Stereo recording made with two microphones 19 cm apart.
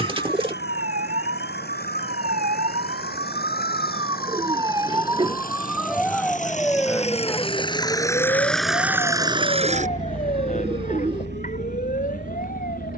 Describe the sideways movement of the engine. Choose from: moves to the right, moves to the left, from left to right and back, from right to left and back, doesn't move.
moves to the right.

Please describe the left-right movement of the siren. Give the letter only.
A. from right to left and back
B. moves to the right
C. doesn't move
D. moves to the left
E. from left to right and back
D.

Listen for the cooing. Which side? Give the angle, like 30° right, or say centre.
30° right.